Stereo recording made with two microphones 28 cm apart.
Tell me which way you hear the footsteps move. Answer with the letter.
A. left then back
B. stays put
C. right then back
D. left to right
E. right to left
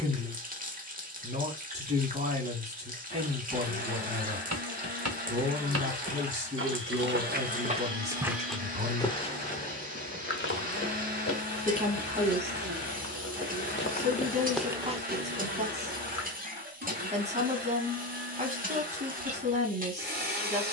A.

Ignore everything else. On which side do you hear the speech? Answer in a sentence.
You can hear the speech on the right.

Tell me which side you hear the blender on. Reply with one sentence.
You can hear the blender on the right.